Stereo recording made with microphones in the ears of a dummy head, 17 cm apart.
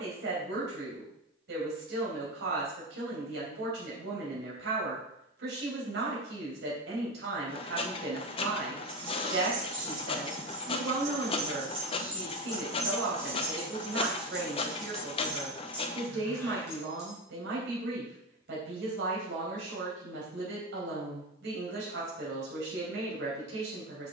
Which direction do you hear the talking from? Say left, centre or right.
right.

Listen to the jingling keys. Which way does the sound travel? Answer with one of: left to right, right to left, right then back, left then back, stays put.
right to left.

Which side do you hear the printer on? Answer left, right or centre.
left.